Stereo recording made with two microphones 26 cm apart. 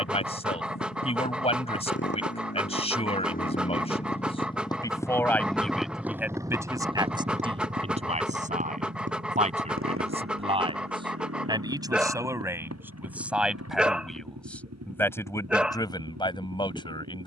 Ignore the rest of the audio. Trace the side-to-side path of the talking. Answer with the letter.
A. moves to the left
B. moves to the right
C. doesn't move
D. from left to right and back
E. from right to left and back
D.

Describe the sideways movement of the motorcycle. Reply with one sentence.
In this clip you hear the motorcycle move from left to right.